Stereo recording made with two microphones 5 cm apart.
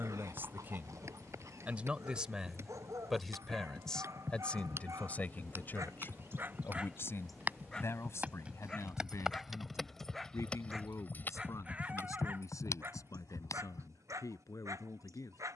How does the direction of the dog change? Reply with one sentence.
In this clip you hear the dog move from right to left and back again.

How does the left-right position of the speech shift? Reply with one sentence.
You can hear the speech move to the left.